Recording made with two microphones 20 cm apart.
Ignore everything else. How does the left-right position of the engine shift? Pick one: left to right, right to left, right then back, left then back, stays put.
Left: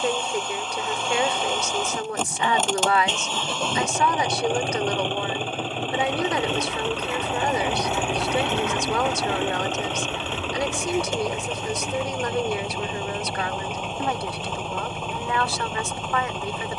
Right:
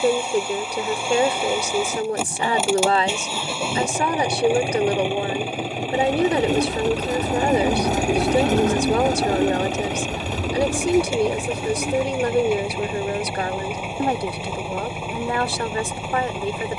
stays put.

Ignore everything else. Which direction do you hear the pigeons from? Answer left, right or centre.
right.